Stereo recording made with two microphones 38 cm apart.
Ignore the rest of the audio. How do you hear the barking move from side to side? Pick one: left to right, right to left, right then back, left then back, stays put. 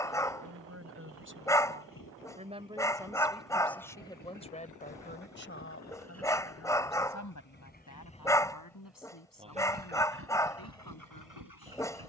stays put.